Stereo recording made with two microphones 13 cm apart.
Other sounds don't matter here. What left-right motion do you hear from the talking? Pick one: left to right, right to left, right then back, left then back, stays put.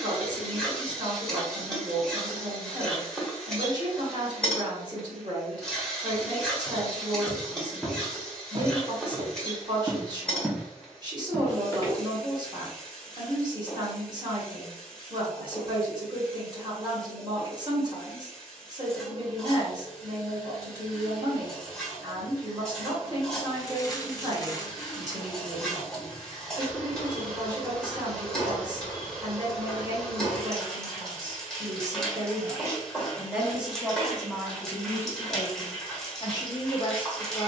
right to left.